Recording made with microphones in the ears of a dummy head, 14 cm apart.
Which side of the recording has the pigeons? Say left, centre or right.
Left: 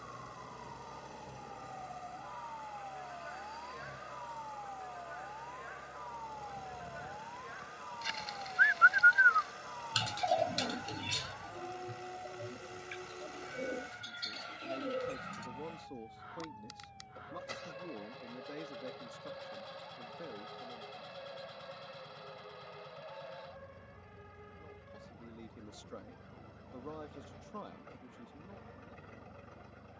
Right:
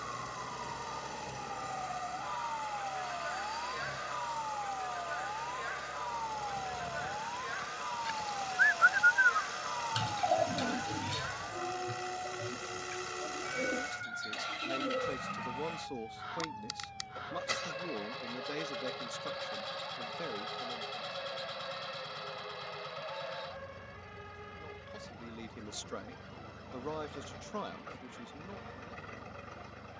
left.